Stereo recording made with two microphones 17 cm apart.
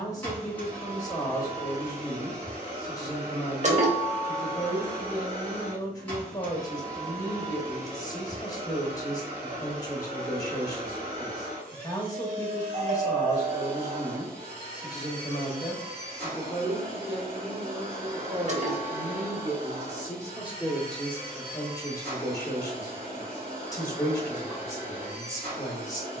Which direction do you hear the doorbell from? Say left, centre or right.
right.